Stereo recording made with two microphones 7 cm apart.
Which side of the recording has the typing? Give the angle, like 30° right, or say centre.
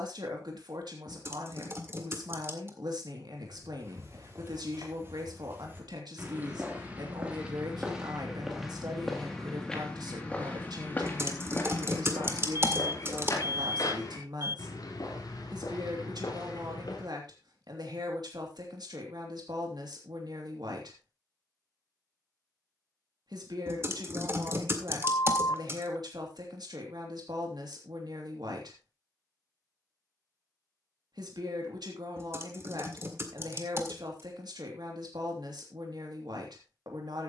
40° right.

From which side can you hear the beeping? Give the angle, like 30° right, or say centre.
60° left.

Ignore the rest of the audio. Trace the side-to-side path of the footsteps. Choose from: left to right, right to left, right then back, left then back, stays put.
right to left.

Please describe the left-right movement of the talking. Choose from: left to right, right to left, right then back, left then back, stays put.
stays put.